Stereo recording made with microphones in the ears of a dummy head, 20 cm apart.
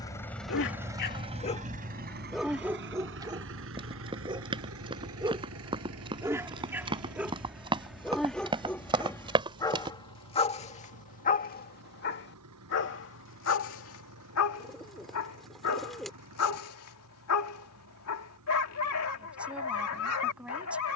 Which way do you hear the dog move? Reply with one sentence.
In this clip you hear the dog move from left to right and back again.